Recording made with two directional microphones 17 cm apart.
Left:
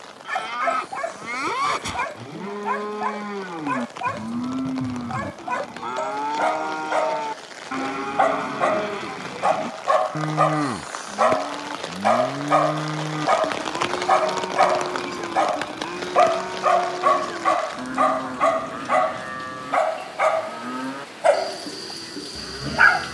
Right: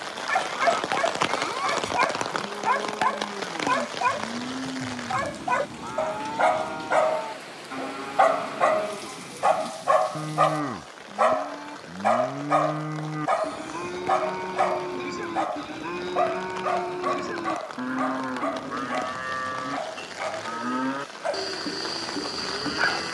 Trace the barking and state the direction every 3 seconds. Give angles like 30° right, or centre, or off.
20° right, 20° right, 10° right, 10° left, 30° left, 50° left, 60° left, 60° left.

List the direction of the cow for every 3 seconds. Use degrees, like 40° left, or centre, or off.
40° left, 40° left, 40° left, 30° left, 10° left, centre, 20° right, 20° right.